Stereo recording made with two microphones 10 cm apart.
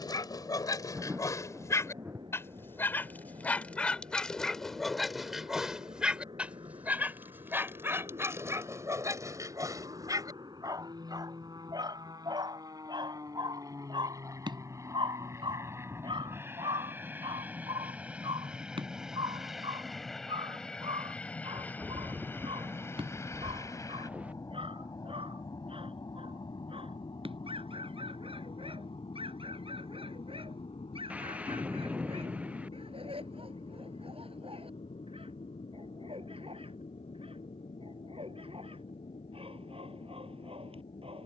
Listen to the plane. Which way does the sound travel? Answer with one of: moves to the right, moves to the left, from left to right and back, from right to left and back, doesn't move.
moves to the left.